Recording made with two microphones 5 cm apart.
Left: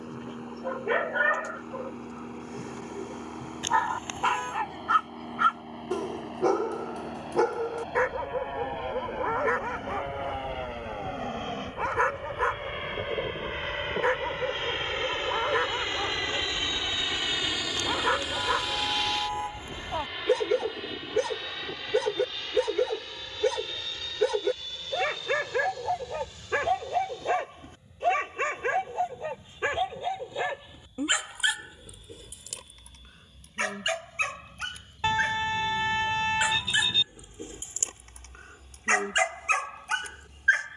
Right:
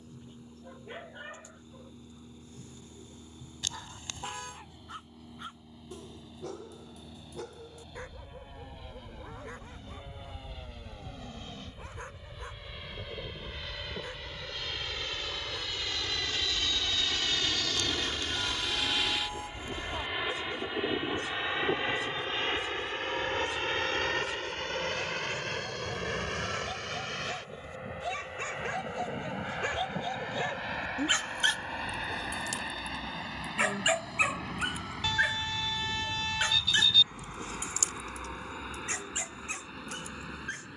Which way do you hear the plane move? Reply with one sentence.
You can hear the plane travel towards the right.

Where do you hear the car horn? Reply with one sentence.
In this clip you hear the car horn on the left.